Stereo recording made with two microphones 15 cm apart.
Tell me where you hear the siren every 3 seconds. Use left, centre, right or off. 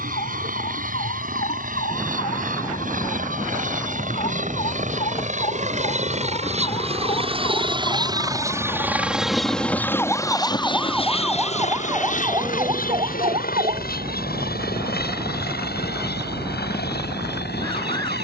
left, left, left, centre, right, right.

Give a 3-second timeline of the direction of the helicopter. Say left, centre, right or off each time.
right, right, right, left, left, left.